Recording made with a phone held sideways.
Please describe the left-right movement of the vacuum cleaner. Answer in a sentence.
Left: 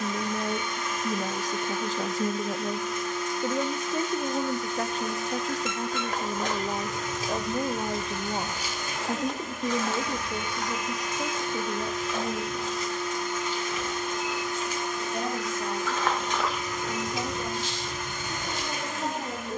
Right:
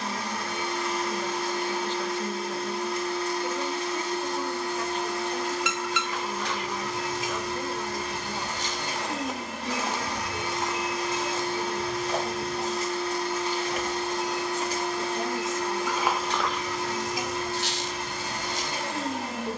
In this clip you hear the vacuum cleaner stay put.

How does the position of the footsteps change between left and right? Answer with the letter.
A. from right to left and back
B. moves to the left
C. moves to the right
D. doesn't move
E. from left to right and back
E.